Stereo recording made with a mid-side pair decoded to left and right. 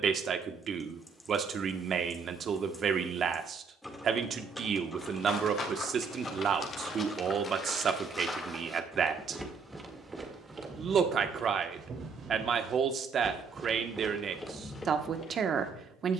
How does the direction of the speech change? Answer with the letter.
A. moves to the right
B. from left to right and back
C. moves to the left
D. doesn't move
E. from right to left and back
D.